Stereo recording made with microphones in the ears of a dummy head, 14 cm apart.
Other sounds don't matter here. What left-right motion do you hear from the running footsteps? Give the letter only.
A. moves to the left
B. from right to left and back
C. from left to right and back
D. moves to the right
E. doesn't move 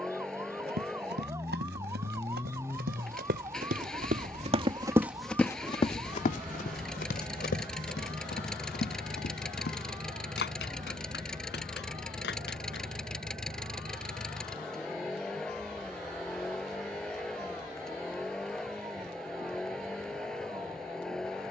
A.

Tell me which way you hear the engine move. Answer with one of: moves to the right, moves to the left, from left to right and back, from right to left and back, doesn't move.
doesn't move.